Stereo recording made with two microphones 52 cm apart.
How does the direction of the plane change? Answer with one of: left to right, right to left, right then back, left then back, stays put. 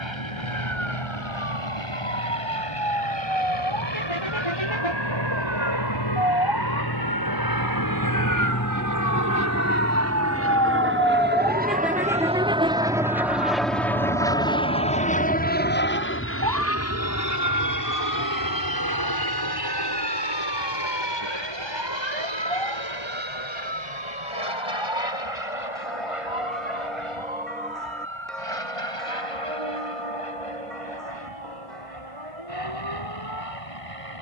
right to left.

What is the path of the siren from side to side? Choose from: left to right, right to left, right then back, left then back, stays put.
left to right.